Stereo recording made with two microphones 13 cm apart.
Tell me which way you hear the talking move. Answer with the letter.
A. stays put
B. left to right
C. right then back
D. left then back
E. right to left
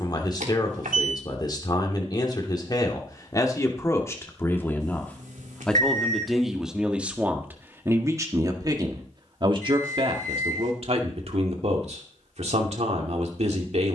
B.